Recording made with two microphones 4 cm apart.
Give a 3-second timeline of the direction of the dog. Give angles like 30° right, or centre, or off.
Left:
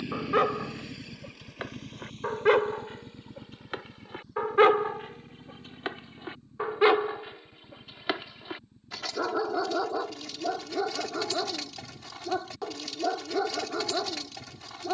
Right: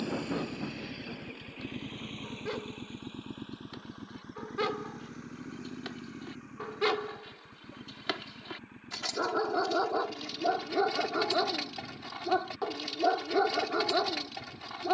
70° left, 50° left, 20° left, 10° right, 10° right.